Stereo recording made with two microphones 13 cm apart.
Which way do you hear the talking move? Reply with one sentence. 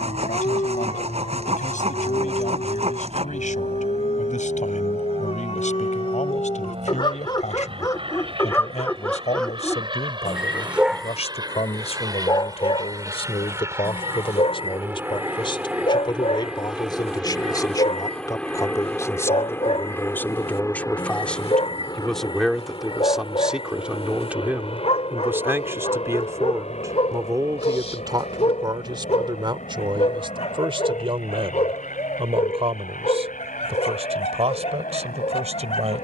In this clip you hear the talking travel towards the right.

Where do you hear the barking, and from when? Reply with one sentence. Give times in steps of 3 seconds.
In this clip you hear the barking on the left from 0 s, in the centre from 9 s and on the left from 12 s.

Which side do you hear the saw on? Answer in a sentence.
You can hear the saw on the right.